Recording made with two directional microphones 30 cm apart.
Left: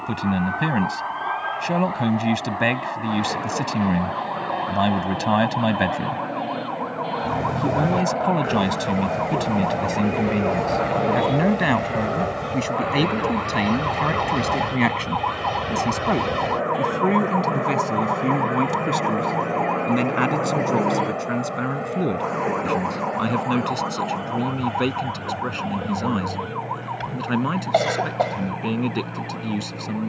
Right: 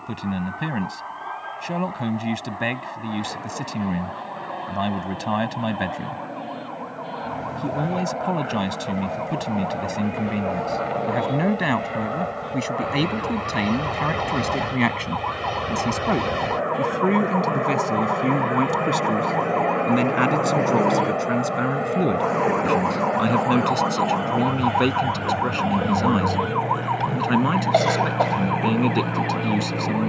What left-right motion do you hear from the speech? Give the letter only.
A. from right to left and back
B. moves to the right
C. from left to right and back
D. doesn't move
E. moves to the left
B.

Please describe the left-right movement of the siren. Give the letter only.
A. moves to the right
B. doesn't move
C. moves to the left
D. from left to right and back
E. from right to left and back
A.